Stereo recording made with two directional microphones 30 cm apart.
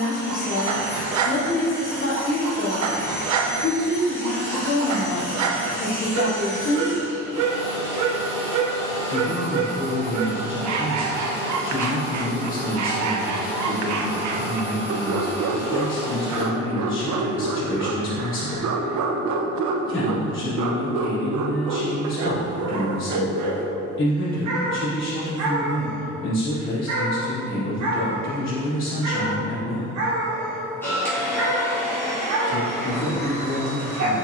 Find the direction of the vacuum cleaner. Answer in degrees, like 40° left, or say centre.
10° left.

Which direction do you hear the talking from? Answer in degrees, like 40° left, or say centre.
40° left.